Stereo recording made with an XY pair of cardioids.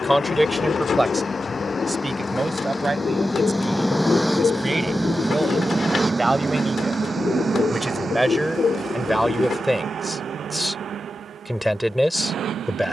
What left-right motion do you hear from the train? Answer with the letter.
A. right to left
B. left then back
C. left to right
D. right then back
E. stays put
C.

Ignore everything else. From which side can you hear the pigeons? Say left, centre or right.
left.